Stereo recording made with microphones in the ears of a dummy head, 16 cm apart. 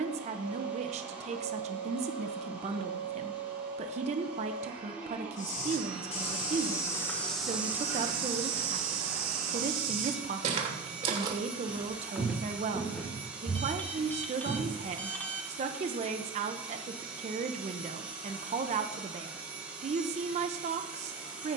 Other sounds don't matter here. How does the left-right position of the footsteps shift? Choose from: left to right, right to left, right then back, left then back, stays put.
right then back.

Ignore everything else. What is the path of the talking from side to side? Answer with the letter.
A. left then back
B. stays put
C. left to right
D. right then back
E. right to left
B.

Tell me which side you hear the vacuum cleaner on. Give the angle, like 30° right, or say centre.
10° right.